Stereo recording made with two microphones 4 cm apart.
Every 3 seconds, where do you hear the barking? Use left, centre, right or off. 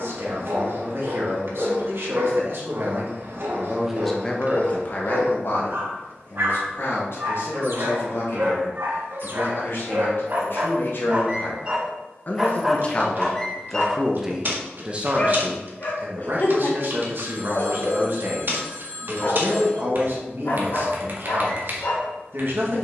right, right, right, right, centre, left, left, left.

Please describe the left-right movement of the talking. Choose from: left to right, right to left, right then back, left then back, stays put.
left then back.